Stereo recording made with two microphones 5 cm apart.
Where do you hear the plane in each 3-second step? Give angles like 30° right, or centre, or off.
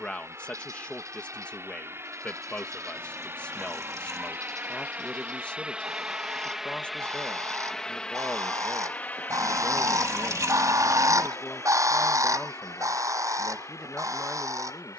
60° right, 30° right, 10° left, 40° left, 60° left.